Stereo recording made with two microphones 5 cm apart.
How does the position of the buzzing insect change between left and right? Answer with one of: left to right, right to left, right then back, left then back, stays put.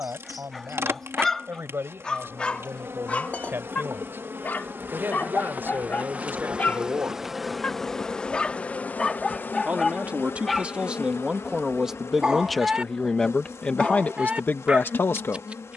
right to left.